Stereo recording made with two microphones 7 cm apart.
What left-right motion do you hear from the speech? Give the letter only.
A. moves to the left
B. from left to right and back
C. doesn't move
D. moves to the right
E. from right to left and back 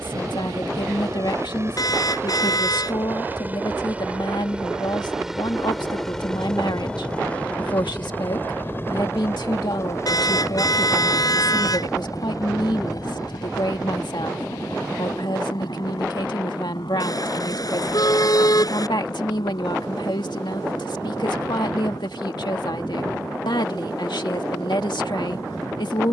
C.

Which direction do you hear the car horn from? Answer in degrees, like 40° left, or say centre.
60° left.